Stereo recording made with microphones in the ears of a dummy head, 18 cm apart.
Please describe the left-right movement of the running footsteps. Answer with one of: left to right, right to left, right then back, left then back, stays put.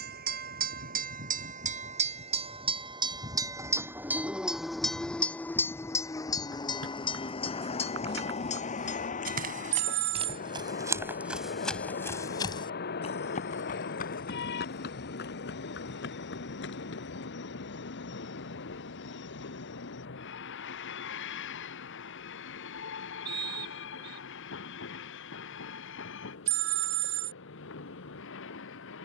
right to left.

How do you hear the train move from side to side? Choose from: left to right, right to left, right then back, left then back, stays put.
right to left.